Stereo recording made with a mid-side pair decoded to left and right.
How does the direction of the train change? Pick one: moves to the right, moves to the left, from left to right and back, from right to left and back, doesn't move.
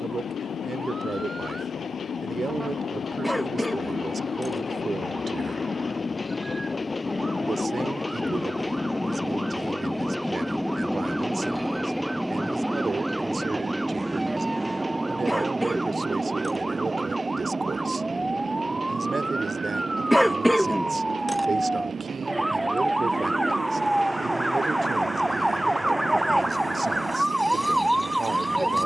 moves to the right.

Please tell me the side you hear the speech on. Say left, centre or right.
right.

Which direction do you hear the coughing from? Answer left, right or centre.
centre.